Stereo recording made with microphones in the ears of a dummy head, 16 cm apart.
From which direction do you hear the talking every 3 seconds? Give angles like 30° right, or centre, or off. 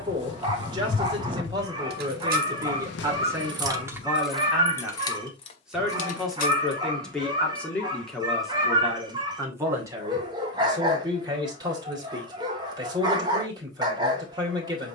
20° right, 10° right, centre, 20° right, 20° right.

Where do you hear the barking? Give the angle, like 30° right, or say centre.
20° right.